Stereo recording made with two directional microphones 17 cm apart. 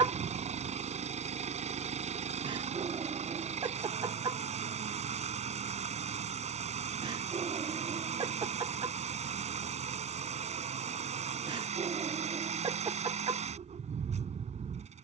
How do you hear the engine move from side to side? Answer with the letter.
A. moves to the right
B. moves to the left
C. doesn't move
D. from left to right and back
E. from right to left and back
C.